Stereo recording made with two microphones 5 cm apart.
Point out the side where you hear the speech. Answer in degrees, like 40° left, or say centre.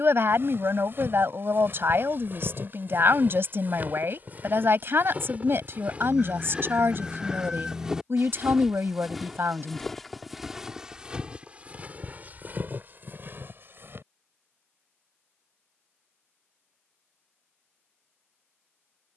60° right.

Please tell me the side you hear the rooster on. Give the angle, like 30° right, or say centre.
10° right.